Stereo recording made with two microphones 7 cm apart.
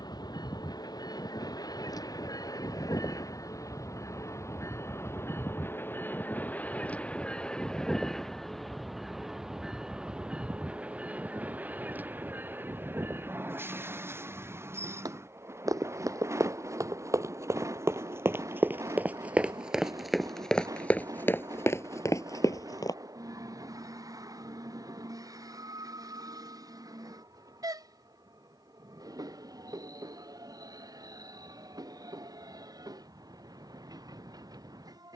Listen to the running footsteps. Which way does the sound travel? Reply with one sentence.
You can hear the running footsteps move from right to left.